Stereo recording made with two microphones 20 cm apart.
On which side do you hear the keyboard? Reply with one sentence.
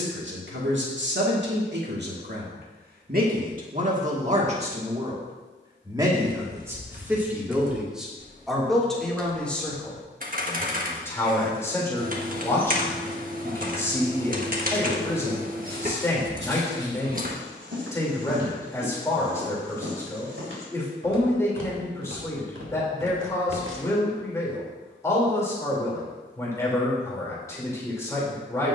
In this clip you hear the keyboard on the right.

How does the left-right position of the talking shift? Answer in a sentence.
You can hear the talking move from right to left.